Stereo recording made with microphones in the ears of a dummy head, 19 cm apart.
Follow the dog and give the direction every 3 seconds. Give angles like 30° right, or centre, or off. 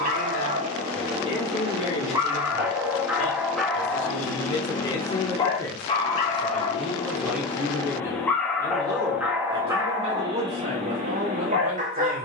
20° right, 10° left, 20° left, 20° right.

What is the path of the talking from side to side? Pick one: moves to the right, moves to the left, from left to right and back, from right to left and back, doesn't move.
moves to the right.